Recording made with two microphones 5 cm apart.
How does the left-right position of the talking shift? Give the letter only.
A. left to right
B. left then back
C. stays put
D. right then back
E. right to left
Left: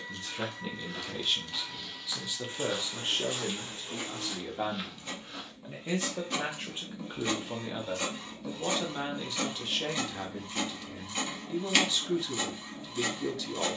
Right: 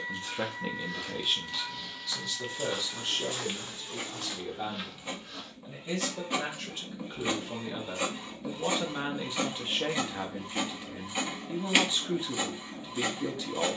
B.